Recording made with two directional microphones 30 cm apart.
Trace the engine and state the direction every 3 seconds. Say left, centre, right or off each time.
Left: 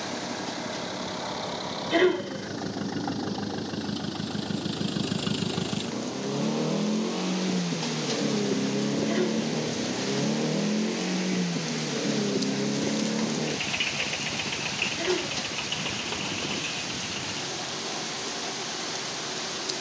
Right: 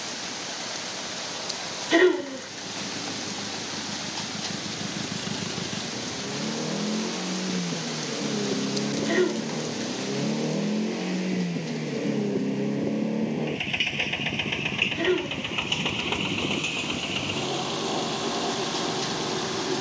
left, left, left, centre, right, right, right.